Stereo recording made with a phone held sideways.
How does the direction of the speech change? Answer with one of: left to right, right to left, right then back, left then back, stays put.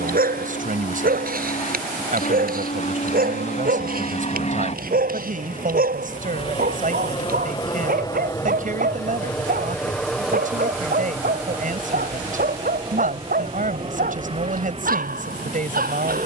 stays put.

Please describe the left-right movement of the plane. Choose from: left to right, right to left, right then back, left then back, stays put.
left to right.